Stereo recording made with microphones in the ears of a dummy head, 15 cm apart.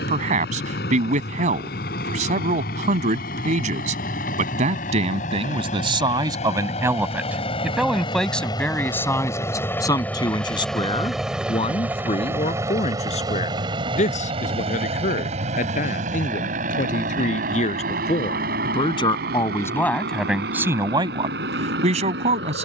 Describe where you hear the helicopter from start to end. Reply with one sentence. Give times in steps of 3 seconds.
In this clip you hear the helicopter on the left from 0 s, in the centre from 9 s and on the right from 12 s.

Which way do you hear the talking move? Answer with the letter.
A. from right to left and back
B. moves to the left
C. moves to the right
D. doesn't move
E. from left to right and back
A.